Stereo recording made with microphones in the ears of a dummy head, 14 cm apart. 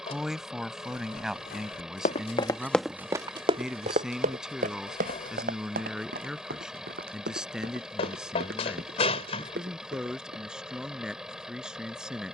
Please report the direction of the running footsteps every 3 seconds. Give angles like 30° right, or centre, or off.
50° left, 50° right, 70° right, 70° right.